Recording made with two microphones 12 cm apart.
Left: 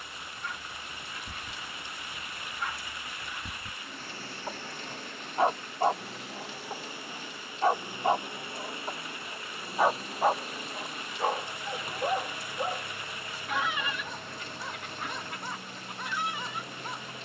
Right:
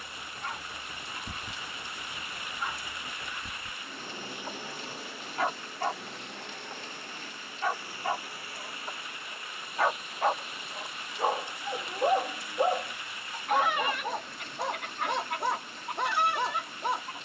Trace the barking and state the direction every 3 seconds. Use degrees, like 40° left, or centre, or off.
30° right, 20° left, 30° left, centre, 50° right, 70° right.